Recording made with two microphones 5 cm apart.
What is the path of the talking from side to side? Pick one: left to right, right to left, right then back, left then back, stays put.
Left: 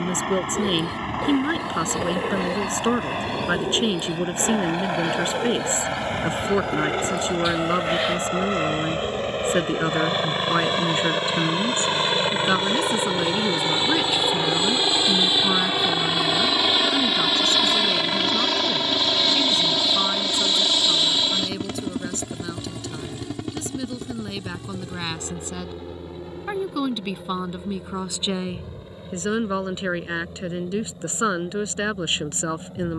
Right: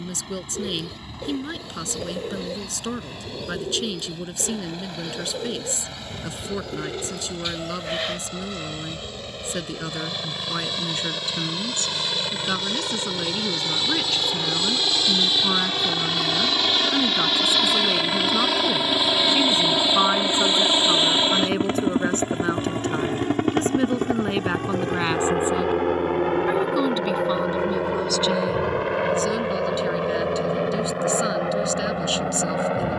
right then back.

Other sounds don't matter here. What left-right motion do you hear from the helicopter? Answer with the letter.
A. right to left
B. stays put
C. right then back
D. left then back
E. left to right
E.